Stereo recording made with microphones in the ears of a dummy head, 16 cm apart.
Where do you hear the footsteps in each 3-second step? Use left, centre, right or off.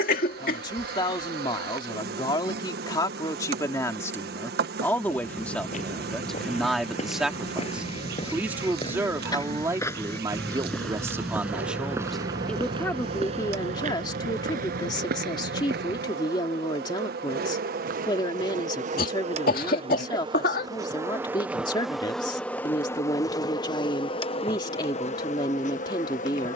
off, left, left, centre, right, right, off, off, off.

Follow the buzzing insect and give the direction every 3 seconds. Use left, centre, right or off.
right, right, right, right, right, right, right, centre, left.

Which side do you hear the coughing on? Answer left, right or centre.
left.